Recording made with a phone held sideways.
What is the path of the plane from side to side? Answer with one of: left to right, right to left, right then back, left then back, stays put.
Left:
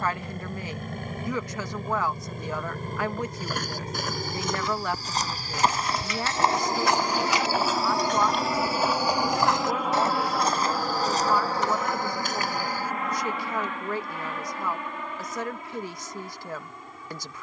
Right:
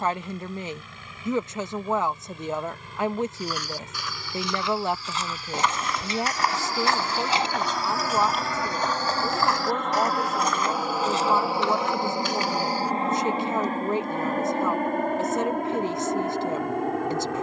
left to right.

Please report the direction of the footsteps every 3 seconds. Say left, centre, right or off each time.
off, left, centre, left, left, off.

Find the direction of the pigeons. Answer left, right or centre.
right.